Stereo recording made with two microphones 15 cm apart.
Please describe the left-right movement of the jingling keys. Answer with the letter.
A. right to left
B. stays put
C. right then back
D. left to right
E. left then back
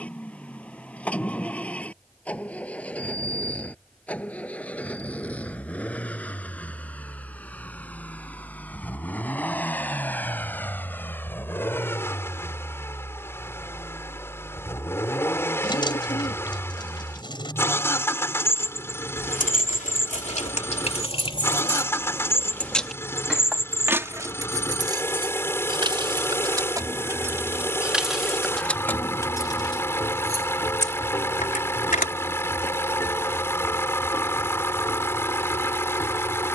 C.